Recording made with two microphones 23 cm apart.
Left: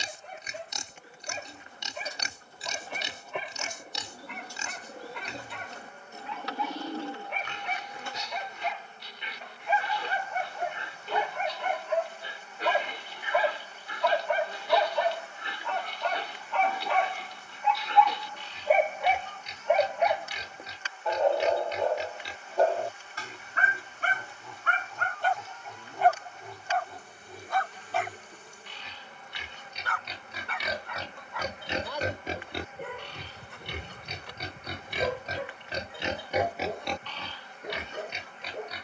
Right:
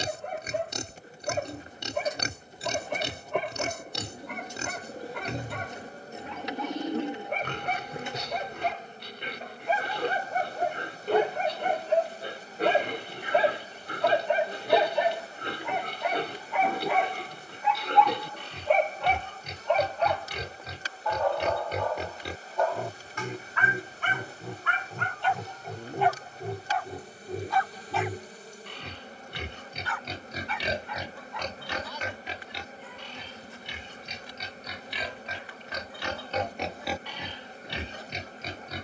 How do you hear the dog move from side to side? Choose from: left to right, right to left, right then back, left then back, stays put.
right to left.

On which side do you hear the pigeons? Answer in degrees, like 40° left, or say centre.
20° right.